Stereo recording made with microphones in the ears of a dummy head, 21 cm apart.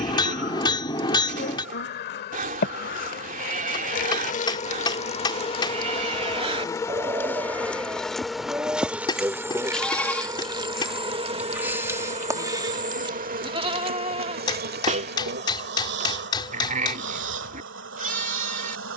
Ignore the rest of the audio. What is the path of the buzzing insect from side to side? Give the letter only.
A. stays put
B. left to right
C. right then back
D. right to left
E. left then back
B.